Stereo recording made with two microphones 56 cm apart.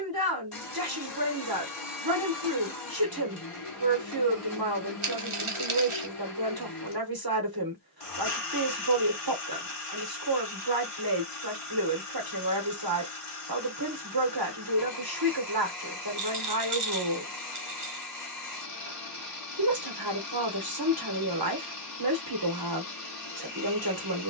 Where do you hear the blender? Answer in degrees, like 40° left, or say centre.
70° left.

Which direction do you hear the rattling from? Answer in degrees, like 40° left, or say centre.
60° right.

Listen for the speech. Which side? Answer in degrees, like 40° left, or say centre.
40° right.